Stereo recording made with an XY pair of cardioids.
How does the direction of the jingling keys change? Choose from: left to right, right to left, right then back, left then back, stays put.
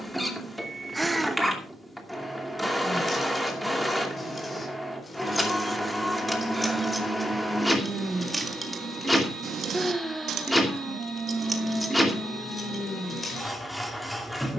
right then back.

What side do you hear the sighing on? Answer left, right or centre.
centre.